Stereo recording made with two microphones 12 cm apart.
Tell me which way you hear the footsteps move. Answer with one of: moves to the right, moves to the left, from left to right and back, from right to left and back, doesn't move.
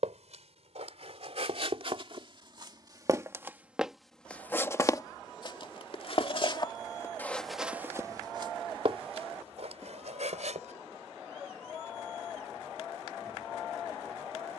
from right to left and back.